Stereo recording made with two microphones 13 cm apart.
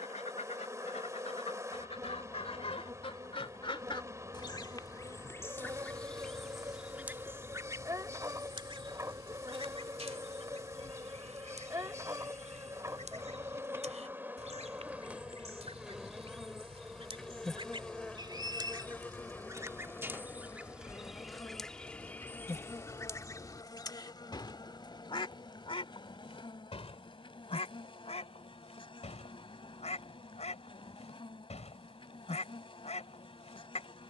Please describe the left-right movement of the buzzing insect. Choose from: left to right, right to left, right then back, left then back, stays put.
right to left.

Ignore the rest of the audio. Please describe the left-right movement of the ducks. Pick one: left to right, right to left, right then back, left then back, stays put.
right then back.